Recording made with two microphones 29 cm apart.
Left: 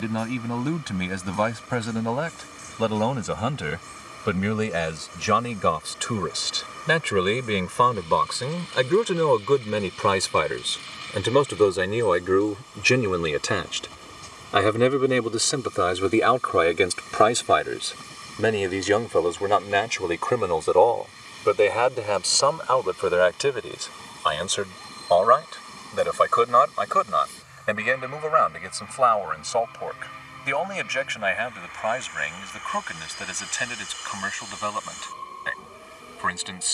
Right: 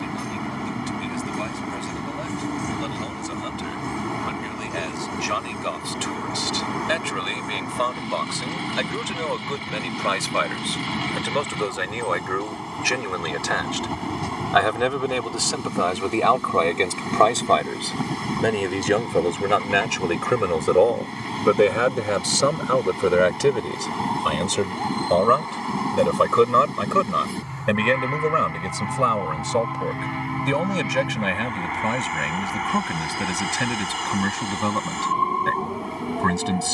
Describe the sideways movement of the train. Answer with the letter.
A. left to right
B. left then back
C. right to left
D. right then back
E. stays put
E.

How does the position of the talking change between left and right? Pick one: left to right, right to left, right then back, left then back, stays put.
left to right.